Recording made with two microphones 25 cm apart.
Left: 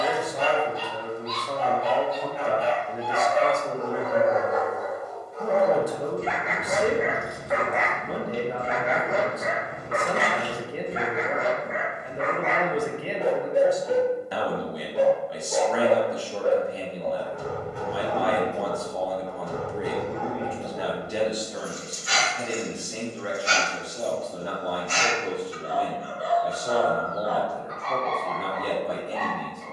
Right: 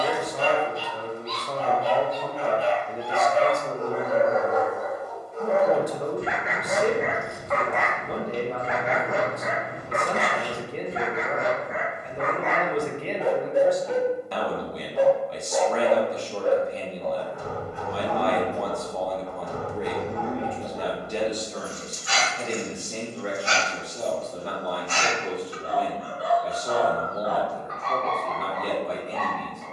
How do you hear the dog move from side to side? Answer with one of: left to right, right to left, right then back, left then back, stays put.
right to left.